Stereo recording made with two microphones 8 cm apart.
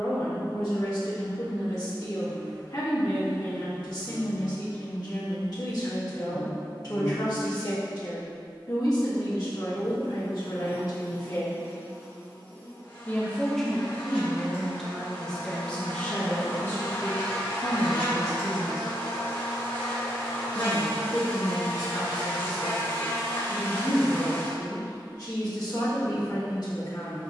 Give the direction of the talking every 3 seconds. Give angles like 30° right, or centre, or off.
60° left, 60° left, 60° left, 60° left, centre, 20° left, 50° left, 60° left, 60° left.